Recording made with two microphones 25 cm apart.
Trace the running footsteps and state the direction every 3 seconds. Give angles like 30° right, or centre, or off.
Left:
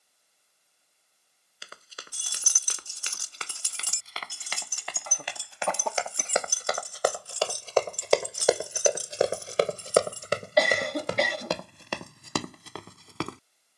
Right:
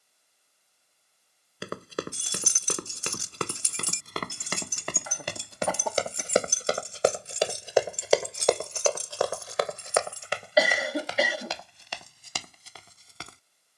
60° right, 50° right, 10° right, 40° left, 70° left.